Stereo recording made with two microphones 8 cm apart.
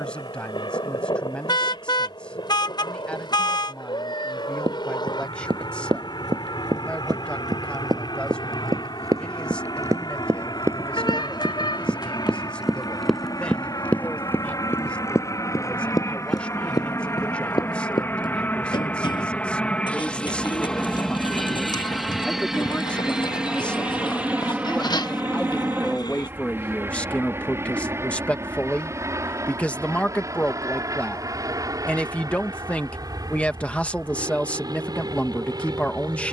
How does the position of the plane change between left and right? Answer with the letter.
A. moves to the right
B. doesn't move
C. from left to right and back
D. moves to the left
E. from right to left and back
A.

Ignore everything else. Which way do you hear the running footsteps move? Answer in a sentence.
In this clip you hear the running footsteps move from right to left.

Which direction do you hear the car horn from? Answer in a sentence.
You can hear the car horn on the left.